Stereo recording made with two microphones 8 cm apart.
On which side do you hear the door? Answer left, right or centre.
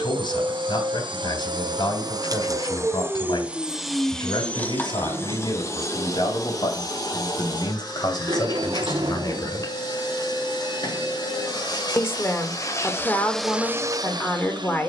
right.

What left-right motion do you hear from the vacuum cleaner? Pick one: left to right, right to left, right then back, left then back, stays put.
left then back.